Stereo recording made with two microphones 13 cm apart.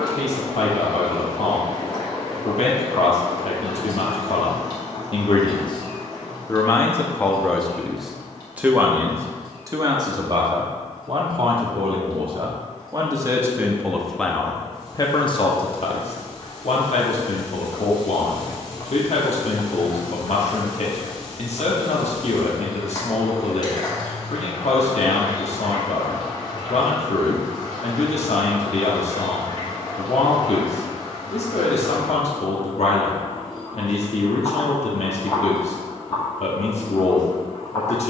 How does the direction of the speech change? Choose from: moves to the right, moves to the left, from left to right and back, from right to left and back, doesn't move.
from left to right and back.